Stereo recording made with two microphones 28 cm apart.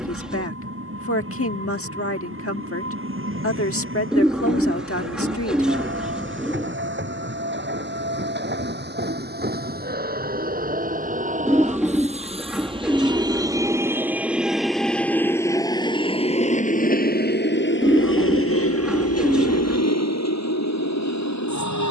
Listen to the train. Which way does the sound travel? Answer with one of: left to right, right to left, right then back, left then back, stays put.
right to left.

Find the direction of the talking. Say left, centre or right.
left.